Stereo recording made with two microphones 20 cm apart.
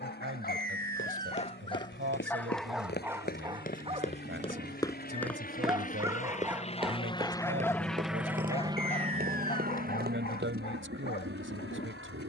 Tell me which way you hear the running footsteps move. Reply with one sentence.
You can hear the running footsteps travel towards the right.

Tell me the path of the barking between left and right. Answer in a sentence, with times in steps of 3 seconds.
In this clip you hear the barking on the left from 0 s, on the right from 3 s, in the centre from 6 s and on the left from 9 s.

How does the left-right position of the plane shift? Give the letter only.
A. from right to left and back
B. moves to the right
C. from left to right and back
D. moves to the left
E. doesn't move
B.